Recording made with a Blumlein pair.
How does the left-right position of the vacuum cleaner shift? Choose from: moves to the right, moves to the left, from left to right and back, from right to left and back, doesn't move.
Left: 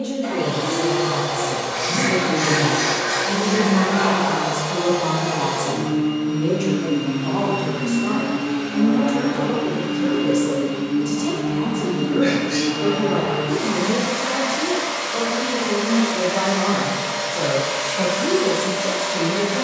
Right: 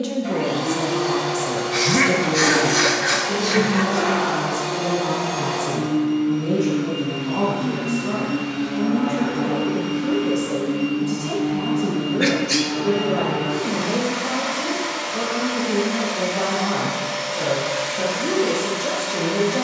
doesn't move.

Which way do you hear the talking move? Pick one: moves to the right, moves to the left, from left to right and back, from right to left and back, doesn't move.
from right to left and back.